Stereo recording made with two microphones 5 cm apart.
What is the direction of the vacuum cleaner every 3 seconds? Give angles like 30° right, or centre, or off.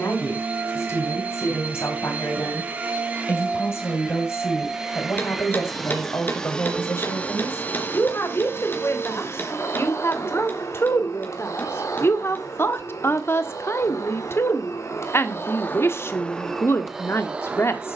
30° right, 10° right, 30° left, 60° left, 70° left, 10° left.